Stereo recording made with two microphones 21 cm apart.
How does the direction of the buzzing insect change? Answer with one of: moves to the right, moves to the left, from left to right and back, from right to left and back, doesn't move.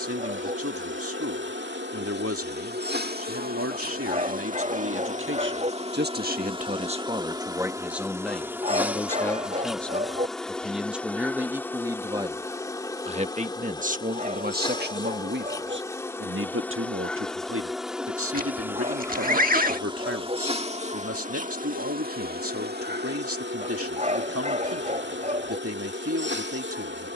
from right to left and back.